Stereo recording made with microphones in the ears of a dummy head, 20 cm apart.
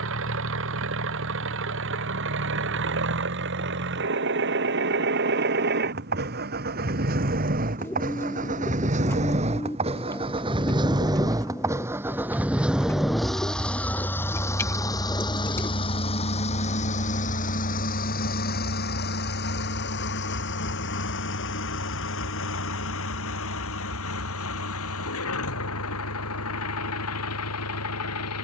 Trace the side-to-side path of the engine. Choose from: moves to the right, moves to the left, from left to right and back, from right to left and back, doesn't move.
moves to the left.